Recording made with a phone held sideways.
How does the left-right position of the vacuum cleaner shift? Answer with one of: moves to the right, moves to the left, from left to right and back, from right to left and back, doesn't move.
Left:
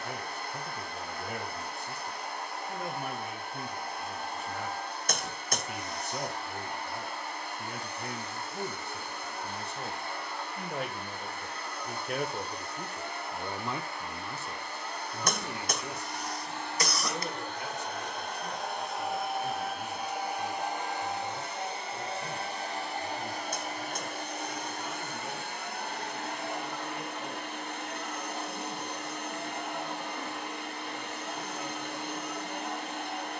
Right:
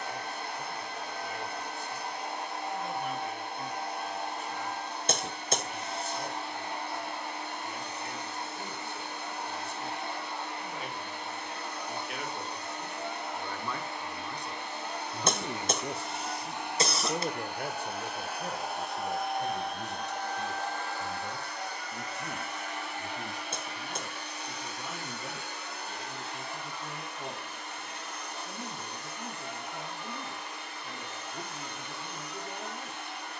moves to the left.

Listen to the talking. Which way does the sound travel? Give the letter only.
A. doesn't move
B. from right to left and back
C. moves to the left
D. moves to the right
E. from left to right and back
D.